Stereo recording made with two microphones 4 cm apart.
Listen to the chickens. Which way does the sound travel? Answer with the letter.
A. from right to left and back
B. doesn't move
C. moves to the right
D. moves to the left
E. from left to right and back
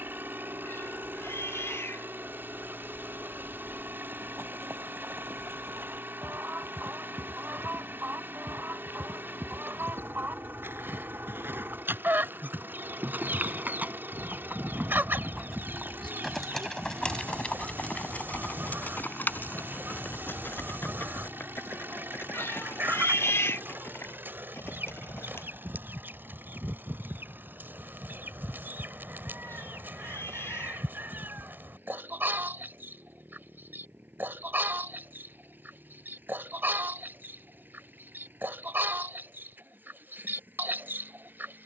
B.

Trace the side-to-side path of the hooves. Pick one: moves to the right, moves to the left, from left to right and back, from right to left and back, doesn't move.
moves to the left.